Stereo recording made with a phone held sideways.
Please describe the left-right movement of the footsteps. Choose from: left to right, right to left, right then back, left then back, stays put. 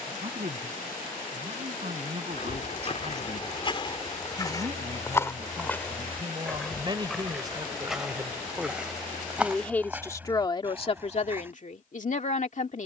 left to right.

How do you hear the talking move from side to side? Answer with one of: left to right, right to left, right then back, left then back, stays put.
right to left.